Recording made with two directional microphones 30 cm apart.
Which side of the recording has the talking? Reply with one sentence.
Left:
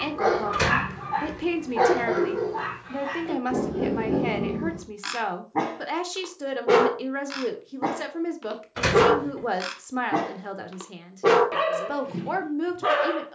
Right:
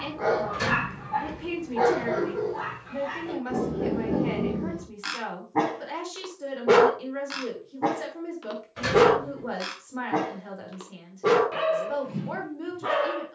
In this clip you hear the talking on the left.